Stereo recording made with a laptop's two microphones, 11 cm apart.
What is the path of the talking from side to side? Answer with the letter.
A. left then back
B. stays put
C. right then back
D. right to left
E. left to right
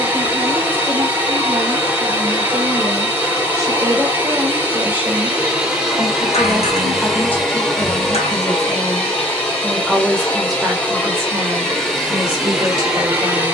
A.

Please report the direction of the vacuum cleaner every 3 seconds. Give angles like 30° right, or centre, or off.
20° right, 20° right, centre, 10° left, 10° right.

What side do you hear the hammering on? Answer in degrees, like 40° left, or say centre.
60° left.